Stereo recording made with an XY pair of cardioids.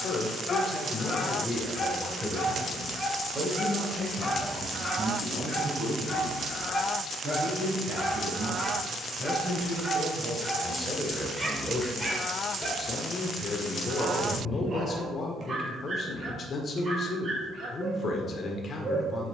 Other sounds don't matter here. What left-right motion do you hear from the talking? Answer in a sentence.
In this clip you hear the talking go right and come back.